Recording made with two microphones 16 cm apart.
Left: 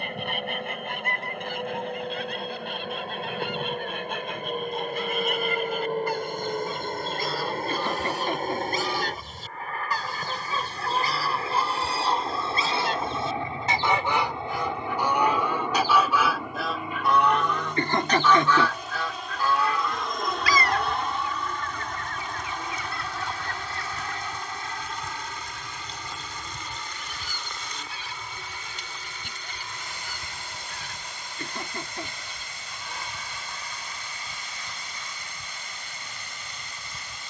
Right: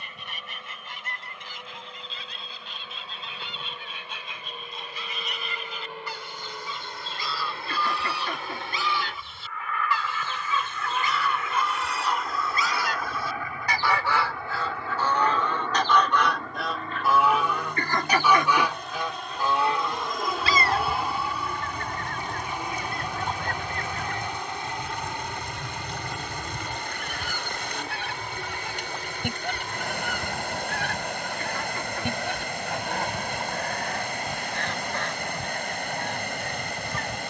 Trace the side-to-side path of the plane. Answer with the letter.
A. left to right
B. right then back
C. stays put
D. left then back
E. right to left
A.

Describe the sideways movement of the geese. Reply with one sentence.
You can hear the geese move from left to right.